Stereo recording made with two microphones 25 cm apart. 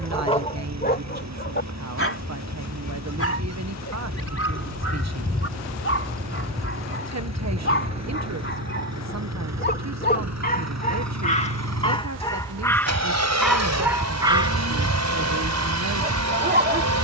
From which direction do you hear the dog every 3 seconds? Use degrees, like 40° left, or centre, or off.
30° left, 60° left, 50° left, 30° left, centre, 30° right.